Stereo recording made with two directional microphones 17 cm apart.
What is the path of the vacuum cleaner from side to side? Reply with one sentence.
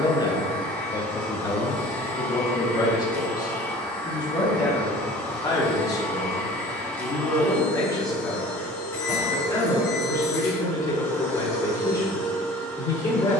In this clip you hear the vacuum cleaner stay in one place.